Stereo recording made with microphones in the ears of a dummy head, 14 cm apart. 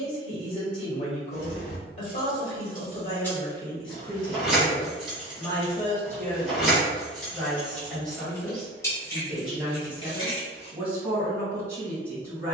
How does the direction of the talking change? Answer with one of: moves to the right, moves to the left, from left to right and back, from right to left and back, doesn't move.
moves to the right.